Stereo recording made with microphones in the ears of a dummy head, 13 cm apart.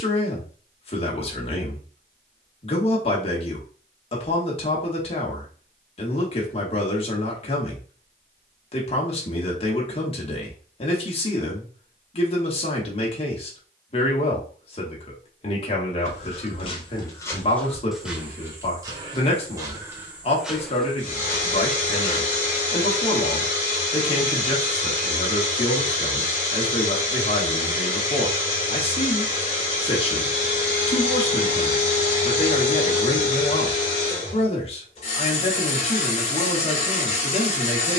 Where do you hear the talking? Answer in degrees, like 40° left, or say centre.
40° left.